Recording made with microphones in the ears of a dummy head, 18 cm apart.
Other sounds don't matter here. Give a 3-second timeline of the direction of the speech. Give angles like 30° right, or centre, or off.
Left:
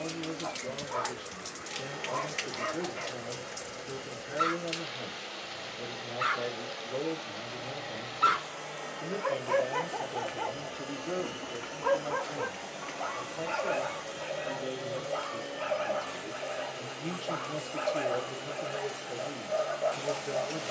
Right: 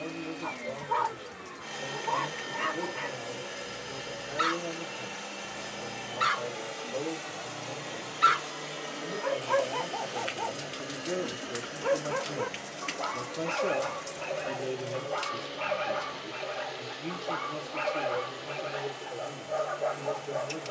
30° left, 30° left, 30° left, centre, 40° right, centre, 20° left.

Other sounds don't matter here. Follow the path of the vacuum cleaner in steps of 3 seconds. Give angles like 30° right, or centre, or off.
80° right, 80° right, 60° right, 20° right, 10° left, 20° left, 20° left.